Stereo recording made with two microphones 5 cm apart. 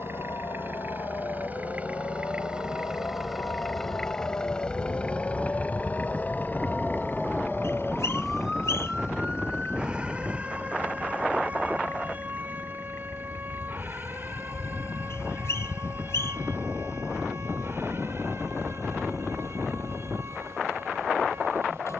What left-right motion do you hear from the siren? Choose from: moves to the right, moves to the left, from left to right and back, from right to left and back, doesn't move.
moves to the right.